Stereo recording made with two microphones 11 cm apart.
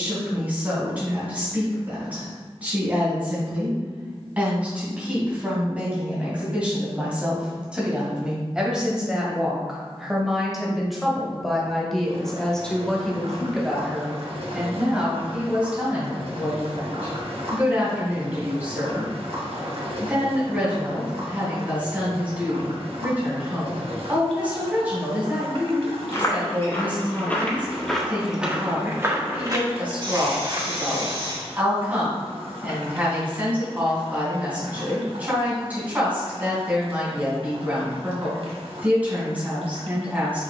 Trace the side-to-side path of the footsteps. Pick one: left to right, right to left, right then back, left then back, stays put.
left to right.